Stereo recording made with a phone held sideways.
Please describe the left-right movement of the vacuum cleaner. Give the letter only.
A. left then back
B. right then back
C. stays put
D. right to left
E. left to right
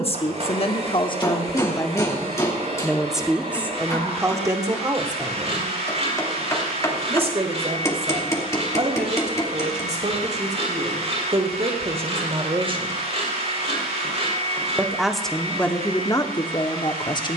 C.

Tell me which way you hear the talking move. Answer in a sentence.
In this clip you hear the talking move from left to right and back again.